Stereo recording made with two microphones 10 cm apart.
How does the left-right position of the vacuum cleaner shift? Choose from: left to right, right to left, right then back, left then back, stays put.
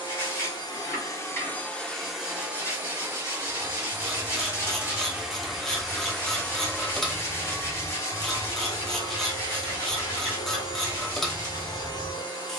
right then back.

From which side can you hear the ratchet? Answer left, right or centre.
centre.